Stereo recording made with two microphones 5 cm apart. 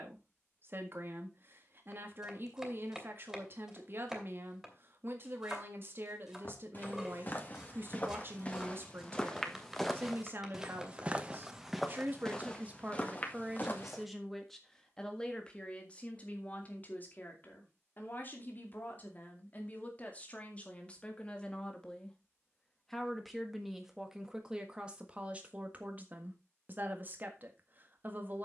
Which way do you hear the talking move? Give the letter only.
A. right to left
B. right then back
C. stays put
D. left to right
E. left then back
E.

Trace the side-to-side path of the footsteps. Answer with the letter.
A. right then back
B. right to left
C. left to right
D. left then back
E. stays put
A.